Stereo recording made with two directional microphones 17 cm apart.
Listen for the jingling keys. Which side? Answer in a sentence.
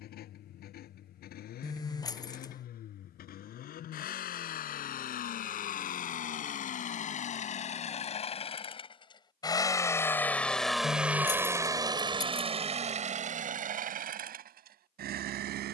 In this clip you hear the jingling keys on the left.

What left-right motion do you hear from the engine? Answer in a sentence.
You can hear the engine travel towards the right.